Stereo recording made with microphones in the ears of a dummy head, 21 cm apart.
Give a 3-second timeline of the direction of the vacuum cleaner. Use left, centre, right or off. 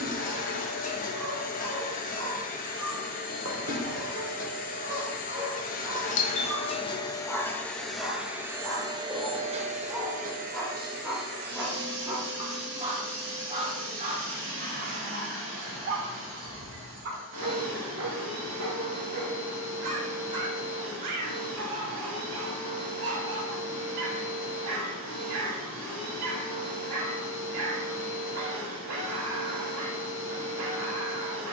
left, left, centre, right, right, right, right, right, right, right, right.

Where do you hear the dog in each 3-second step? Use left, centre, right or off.
right, right, centre, centre, right, right, right, right, right, right, right.